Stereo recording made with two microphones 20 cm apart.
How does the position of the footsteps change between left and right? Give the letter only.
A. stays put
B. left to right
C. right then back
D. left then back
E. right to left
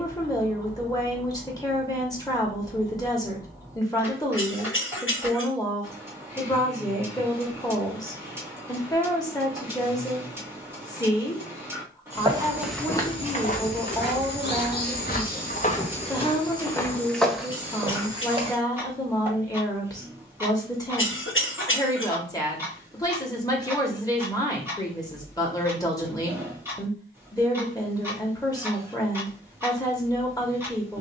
D.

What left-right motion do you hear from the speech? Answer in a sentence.
You can hear the speech stay in one place.